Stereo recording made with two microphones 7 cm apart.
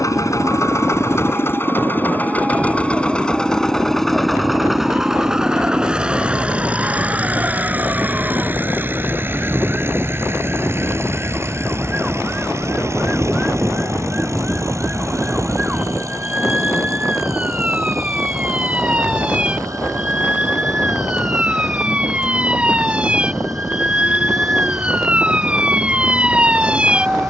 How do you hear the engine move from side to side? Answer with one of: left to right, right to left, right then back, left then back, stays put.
left to right.